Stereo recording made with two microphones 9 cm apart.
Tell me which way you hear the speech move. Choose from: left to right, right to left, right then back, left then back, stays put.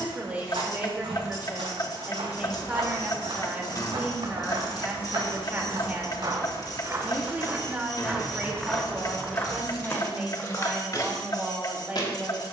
stays put.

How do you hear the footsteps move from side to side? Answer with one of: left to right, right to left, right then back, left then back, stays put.
right to left.